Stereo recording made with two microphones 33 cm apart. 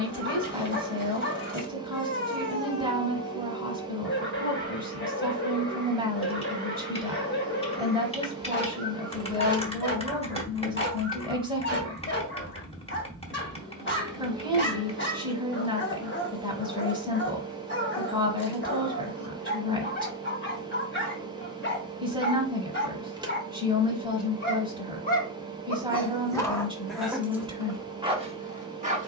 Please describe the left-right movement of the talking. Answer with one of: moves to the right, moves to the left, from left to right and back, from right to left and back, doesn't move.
doesn't move.